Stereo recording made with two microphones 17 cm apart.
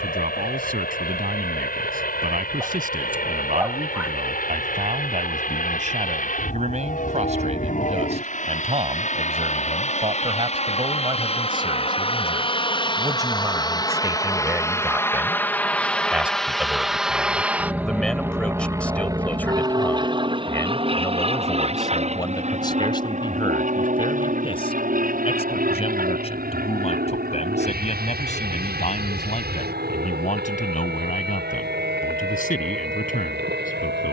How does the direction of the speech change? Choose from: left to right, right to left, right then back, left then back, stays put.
right to left.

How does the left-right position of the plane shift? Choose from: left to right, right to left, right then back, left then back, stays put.
left to right.